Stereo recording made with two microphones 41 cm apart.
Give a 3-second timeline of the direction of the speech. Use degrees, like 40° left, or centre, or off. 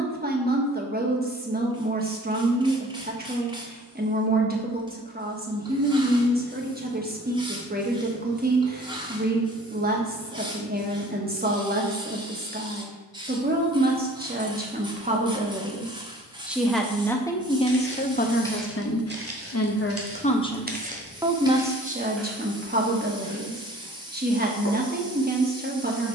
20° right, 20° right, 20° right, 20° right, 20° right, centre, 30° left, 20° right, 20° right.